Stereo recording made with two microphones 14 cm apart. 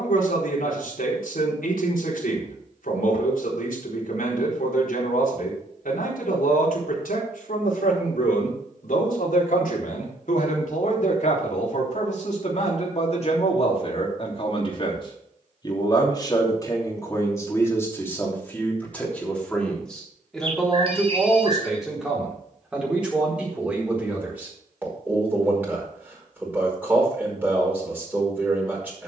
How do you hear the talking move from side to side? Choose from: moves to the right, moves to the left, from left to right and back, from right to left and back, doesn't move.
moves to the right.